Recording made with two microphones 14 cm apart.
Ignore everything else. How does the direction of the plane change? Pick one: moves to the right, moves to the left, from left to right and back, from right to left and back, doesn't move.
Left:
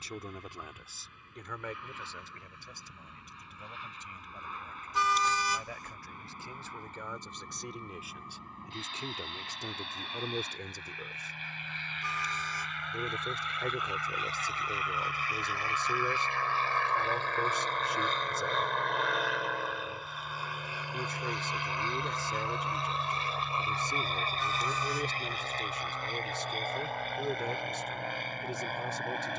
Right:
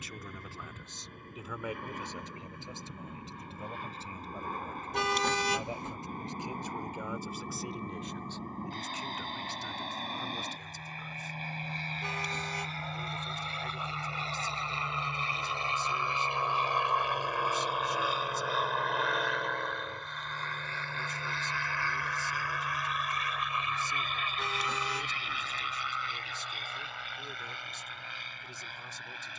moves to the left.